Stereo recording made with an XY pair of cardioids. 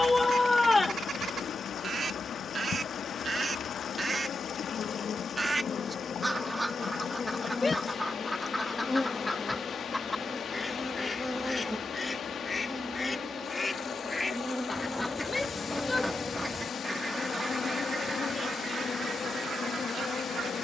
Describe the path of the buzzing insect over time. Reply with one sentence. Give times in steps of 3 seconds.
In this clip you hear the buzzing insect on the left from 0 s, in the centre from 9 s and on the left from 15 s.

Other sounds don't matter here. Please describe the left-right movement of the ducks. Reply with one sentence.
In this clip you hear the ducks go left and come back.